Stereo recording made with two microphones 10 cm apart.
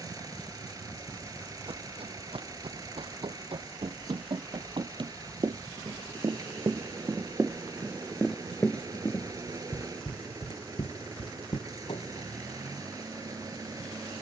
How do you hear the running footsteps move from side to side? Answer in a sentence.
You can hear the running footsteps move from right to left.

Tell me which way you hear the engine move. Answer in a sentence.
You can hear the engine stay put.